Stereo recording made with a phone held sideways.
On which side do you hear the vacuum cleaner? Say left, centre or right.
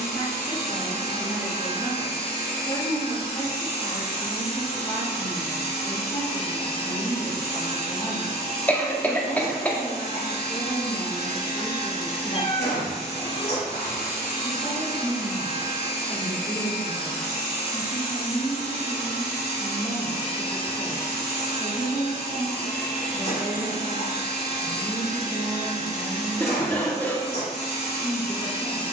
left.